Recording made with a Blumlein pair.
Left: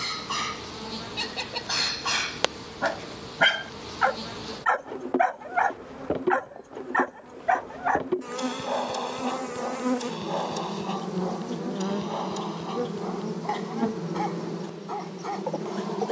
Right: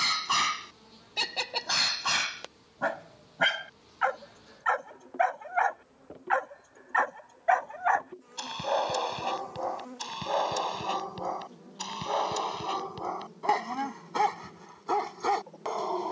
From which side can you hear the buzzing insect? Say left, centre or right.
left.